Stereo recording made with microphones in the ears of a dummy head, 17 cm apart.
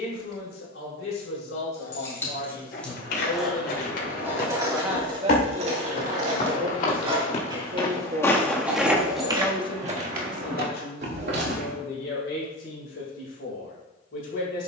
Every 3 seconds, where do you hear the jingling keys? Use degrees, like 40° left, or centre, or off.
10° left, 20° right, 20° right, centre, off.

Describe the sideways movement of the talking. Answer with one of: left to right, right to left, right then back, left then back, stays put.
right then back.